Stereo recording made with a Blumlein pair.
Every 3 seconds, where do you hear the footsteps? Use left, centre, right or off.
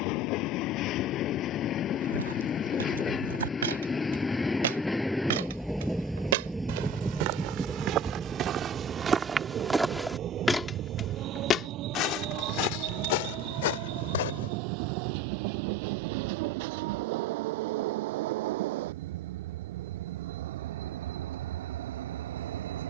right, right, right, centre, left, off, off, off.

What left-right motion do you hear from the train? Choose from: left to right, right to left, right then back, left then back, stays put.
left to right.